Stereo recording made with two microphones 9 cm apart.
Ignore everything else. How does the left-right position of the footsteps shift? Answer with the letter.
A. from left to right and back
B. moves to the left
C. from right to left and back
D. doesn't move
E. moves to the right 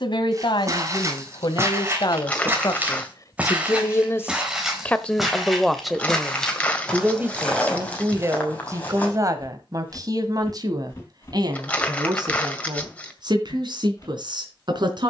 B.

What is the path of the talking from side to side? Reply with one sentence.
You can hear the talking go from the left side to the right.